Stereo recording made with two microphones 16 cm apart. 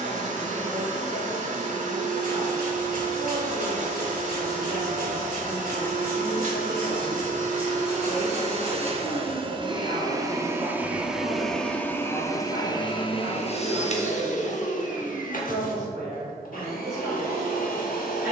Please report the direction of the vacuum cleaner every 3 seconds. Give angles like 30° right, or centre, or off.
50° right, 50° right, 50° right, 10° right, 40° left, 60° left.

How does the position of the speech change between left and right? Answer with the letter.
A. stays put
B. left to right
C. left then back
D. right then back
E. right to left
A.